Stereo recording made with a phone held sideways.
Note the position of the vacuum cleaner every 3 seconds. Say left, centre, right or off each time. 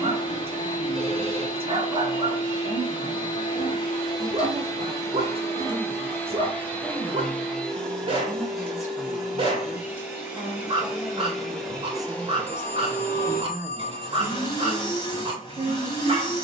left, left, centre, centre, left, left.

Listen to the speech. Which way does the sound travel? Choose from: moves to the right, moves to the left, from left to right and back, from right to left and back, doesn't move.
from right to left and back.